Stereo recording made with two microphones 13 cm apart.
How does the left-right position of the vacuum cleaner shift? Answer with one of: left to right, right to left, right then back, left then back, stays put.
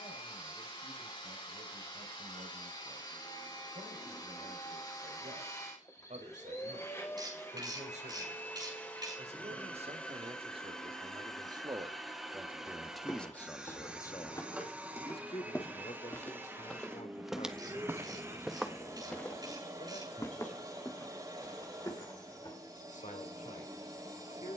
left to right.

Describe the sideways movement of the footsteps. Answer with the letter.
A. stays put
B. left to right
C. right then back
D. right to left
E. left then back
C.